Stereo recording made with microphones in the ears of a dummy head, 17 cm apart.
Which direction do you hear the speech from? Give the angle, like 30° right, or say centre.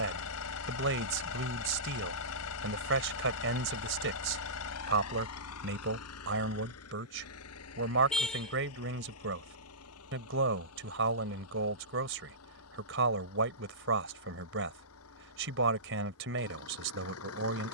70° right.